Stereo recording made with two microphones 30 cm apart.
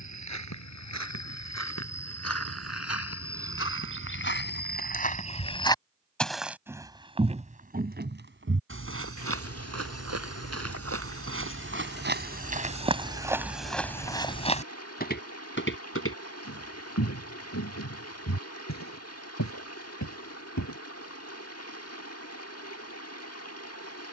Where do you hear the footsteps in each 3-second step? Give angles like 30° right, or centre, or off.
60° left, 40° left, 30° right, 50° right, 10° right, 50° left, 70° left, off.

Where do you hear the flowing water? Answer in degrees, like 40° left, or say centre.
50° left.